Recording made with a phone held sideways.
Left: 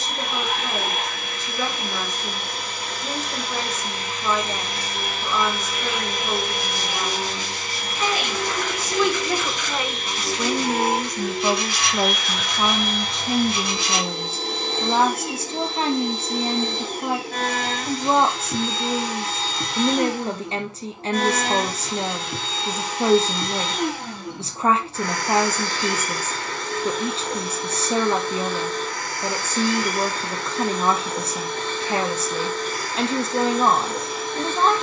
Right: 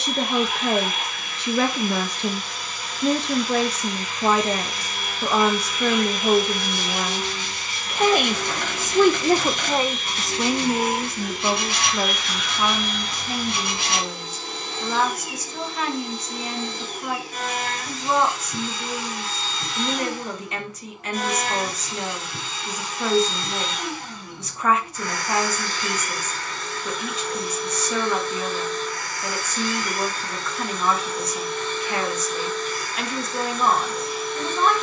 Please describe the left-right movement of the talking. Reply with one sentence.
In this clip you hear the talking move to the left.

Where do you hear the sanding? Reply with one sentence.
In this clip you hear the sanding on the right.